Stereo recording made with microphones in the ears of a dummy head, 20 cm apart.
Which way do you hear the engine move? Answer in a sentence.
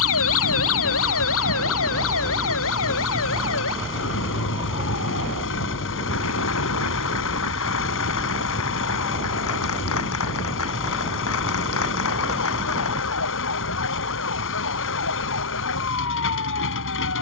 You can hear the engine stay in one place.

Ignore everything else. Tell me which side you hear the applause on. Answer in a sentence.
You can hear the applause on the left.